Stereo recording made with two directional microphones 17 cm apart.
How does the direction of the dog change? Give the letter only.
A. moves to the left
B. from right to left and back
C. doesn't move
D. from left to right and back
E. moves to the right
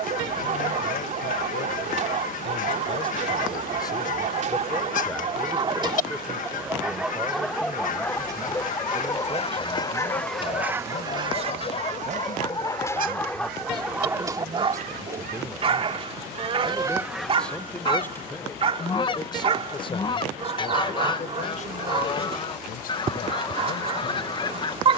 B.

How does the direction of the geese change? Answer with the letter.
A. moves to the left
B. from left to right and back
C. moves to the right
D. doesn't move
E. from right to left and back
B.